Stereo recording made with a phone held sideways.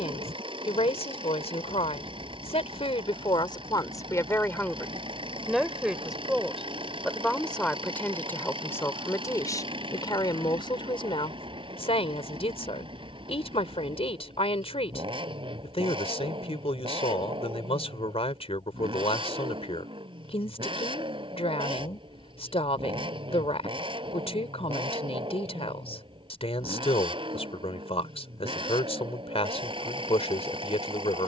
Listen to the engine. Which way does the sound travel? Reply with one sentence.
In this clip you hear the engine stay put.